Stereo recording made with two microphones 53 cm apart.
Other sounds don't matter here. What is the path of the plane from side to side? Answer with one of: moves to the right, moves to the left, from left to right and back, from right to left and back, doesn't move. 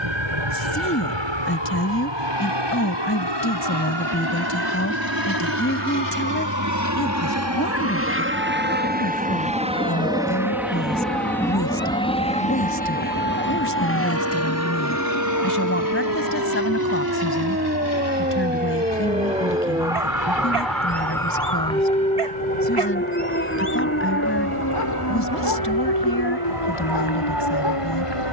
moves to the left.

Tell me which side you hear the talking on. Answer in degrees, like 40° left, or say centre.
20° left.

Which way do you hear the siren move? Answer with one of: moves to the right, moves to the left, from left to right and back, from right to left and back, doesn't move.
moves to the left.